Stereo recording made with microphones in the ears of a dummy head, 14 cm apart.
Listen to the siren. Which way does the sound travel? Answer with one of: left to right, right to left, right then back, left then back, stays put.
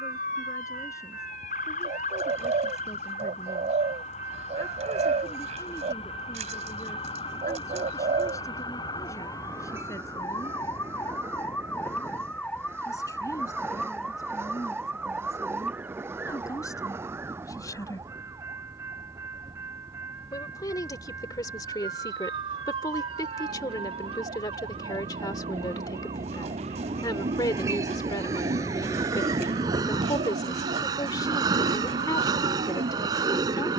left to right.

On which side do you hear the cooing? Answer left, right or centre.
right.